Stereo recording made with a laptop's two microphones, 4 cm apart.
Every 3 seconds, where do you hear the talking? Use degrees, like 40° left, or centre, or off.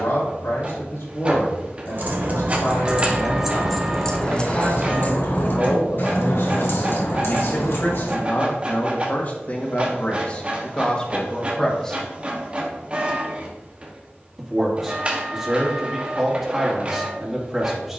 80° left, 80° left, 60° left, 30° left, 10° right, 10° right.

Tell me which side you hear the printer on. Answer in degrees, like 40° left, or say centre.
30° right.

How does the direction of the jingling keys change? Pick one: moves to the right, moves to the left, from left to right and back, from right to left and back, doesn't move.
moves to the left.